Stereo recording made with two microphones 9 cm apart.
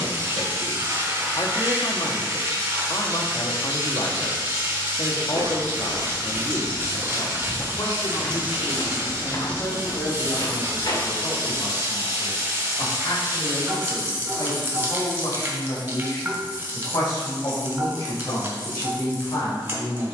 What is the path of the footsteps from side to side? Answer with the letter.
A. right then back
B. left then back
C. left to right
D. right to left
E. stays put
D.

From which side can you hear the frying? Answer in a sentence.
You can hear the frying on the right.